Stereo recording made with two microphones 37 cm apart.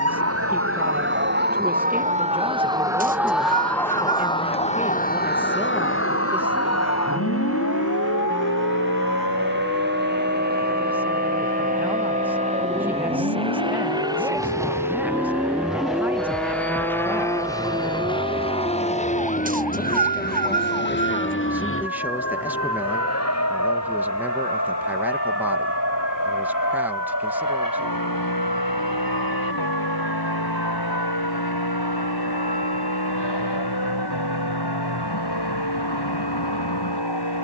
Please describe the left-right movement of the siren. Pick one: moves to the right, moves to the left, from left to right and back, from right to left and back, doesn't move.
moves to the left.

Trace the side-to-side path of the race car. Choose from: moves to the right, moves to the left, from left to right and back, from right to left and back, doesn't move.
moves to the left.